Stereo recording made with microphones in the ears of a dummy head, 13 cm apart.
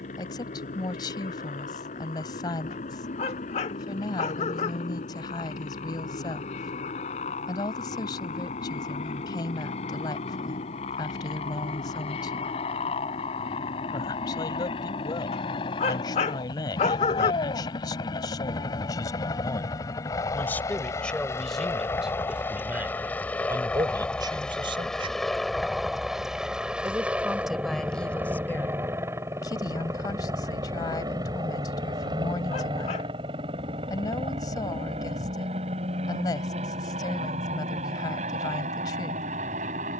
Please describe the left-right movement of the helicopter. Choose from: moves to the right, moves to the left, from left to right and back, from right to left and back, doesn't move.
moves to the right.